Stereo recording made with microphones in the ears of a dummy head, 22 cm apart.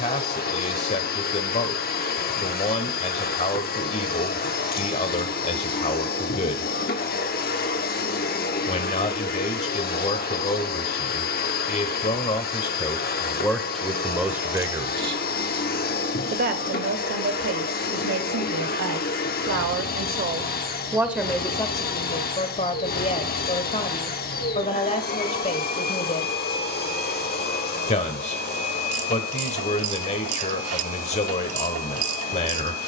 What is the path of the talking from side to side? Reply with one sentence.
In this clip you hear the talking move from left to right and back again.